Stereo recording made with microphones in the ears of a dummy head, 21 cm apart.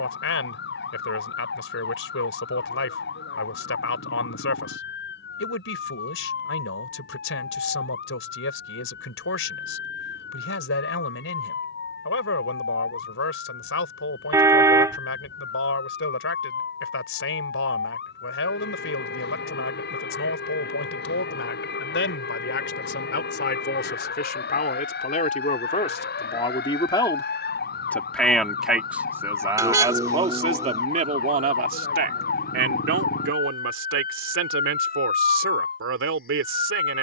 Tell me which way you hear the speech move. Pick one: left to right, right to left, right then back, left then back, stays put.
left to right.